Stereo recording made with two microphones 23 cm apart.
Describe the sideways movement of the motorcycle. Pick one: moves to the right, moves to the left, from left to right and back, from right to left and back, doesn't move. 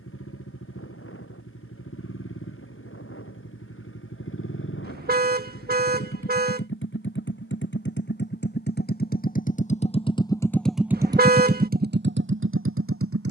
moves to the right.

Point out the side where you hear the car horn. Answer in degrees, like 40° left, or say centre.
40° right.